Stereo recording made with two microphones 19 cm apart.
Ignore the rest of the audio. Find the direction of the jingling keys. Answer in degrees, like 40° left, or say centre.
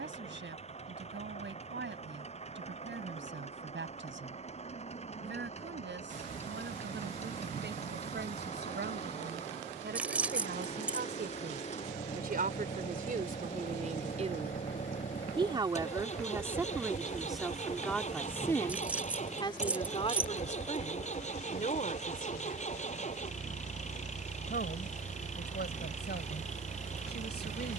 10° right.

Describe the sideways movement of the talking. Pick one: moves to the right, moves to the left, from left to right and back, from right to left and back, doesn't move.
moves to the left.